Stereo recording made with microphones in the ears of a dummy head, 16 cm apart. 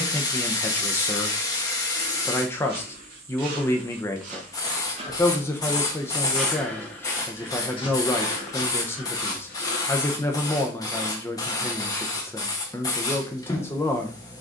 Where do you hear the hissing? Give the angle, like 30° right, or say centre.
20° left.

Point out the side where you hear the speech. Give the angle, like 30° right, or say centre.
10° left.